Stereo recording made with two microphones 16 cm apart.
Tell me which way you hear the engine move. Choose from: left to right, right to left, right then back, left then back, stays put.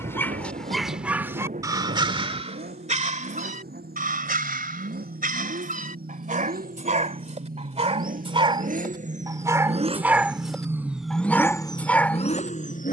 right to left.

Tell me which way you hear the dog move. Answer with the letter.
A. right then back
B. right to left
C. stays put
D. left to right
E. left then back
A.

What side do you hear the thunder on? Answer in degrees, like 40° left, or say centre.
50° right.